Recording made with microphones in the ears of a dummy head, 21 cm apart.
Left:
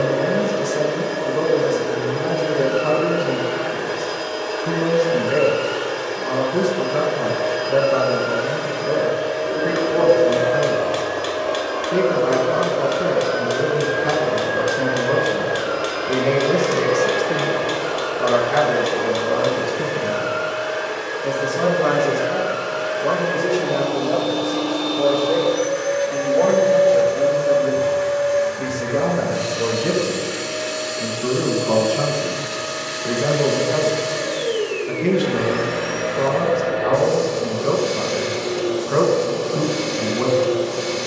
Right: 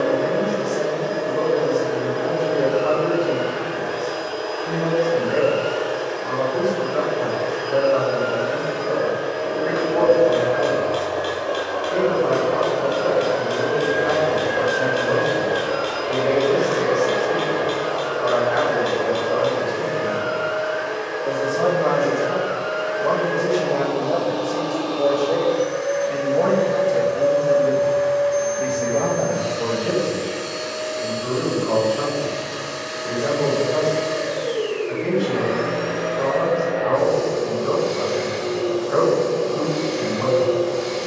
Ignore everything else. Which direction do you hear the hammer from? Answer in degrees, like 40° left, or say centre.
30° left.